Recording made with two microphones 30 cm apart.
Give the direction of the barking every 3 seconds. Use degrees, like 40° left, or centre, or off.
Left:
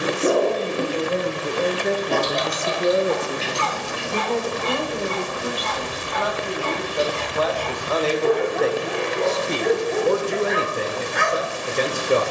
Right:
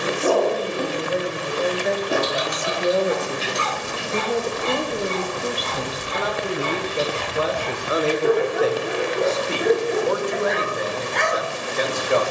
centre, 20° right, 20° right, centre.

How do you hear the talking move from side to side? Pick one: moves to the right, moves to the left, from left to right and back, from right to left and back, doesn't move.
from left to right and back.